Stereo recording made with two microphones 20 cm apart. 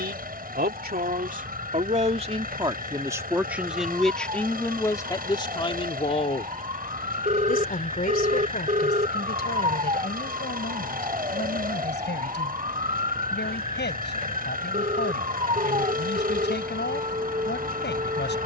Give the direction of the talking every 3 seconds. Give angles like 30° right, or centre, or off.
40° right, 10° left, 40° left, 60° left, 60° left, 60° left.